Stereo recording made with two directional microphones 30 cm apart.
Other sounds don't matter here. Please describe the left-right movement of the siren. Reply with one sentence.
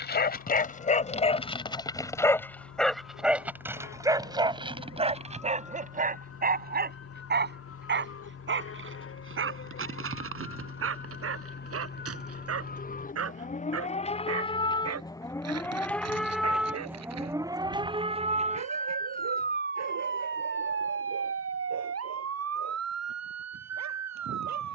In this clip you hear the siren go from the left side to the right.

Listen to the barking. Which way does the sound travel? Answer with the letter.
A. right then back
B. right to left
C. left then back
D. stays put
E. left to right
E.